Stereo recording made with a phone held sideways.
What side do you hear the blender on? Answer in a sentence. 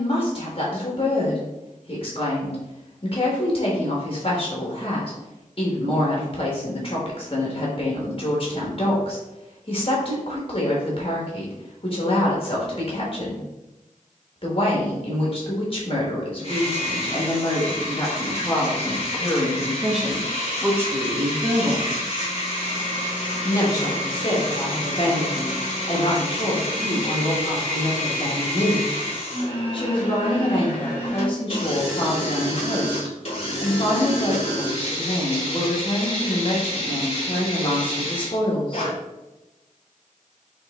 You can hear the blender on the left.